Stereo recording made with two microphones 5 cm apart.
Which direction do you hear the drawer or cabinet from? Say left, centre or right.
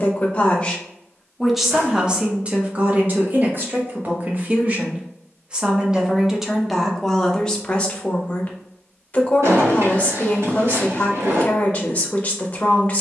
right.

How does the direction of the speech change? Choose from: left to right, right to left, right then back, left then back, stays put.
right then back.